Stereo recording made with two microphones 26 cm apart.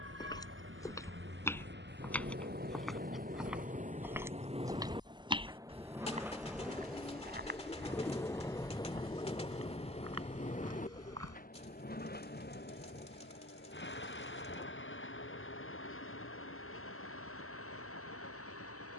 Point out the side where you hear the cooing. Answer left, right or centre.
left.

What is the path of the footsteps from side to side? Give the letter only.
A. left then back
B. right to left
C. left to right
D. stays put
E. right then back
C.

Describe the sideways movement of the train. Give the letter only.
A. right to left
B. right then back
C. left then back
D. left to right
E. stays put
A.